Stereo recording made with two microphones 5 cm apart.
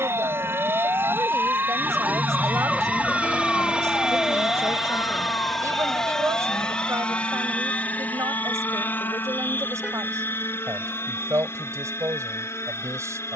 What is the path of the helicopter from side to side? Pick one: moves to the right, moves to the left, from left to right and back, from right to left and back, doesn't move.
moves to the left.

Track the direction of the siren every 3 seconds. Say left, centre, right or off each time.
right, left, left, left, left.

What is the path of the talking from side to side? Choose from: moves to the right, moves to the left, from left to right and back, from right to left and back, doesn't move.
doesn't move.